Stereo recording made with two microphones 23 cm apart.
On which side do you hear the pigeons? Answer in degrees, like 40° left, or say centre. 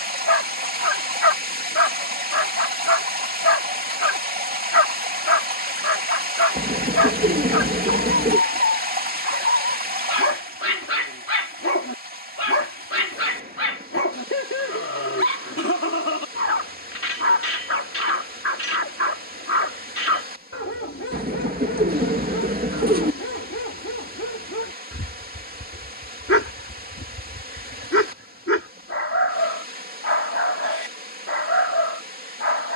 40° right.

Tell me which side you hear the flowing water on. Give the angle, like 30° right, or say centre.
40° right.